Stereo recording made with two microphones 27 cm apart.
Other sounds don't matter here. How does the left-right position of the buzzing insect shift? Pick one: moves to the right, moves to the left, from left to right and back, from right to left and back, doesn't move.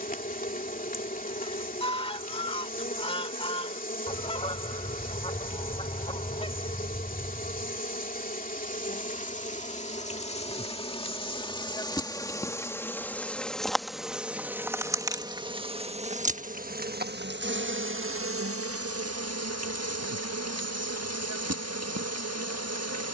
moves to the right.